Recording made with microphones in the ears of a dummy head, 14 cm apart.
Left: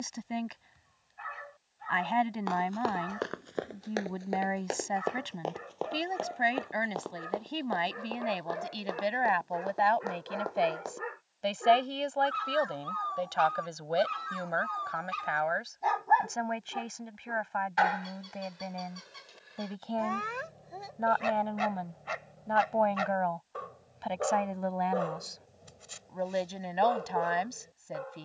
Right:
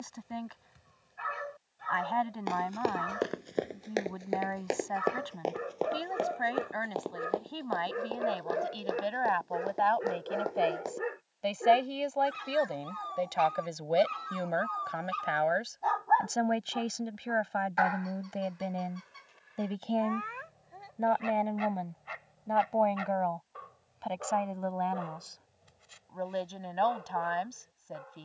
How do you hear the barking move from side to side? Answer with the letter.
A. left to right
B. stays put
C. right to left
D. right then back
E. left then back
C.